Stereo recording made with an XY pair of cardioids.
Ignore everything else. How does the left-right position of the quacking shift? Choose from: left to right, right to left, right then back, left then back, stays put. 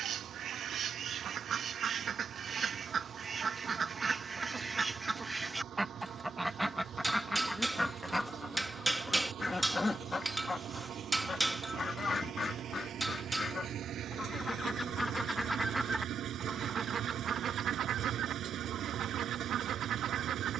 left then back.